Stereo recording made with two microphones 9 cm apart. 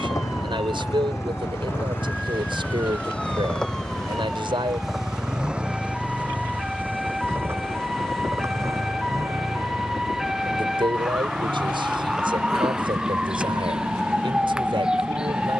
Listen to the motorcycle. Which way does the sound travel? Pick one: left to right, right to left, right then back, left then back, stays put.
left to right.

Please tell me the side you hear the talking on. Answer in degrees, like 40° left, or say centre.
70° right.